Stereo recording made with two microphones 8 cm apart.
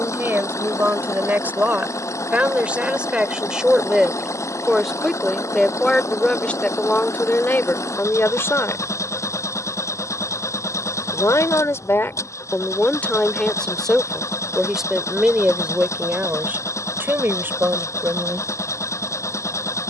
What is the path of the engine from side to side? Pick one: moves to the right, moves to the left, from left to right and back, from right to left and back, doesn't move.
doesn't move.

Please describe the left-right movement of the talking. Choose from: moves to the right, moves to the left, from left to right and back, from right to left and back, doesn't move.
from right to left and back.